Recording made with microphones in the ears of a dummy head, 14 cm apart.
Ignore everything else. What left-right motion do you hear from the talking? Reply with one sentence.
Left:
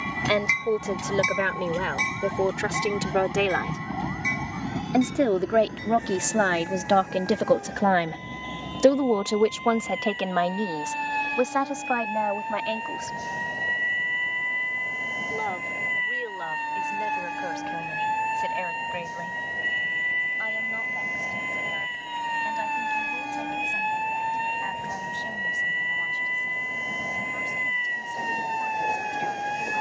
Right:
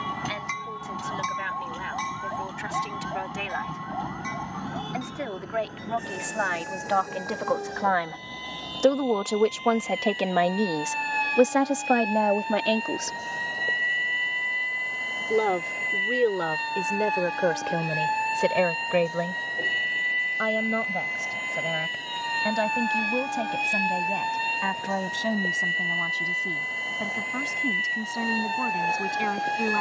You can hear the talking travel towards the right.